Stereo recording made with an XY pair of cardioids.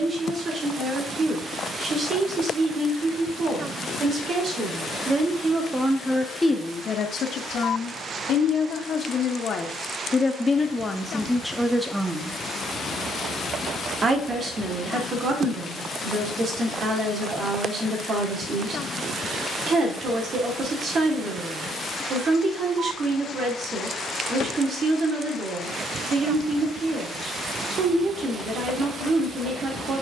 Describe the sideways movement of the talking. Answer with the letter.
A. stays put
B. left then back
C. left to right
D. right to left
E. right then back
B.